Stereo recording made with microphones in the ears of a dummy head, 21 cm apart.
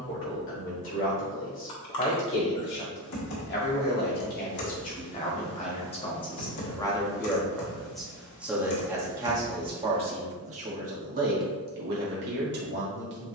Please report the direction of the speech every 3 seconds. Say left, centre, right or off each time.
left, left, centre, right, right.